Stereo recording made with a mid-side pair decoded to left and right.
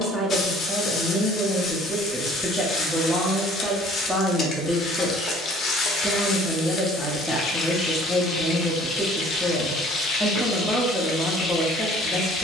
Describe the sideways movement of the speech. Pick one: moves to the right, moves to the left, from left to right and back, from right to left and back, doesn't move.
doesn't move.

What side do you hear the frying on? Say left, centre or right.
left.